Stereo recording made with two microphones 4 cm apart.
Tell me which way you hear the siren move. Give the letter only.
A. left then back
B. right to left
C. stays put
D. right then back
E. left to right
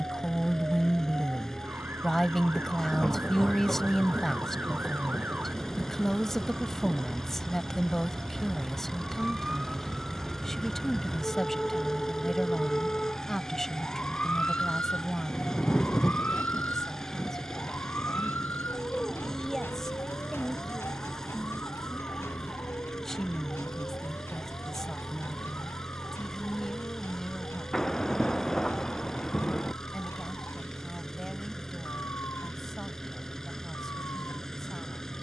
B.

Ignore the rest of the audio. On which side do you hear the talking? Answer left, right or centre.
centre.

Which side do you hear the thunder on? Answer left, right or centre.
centre.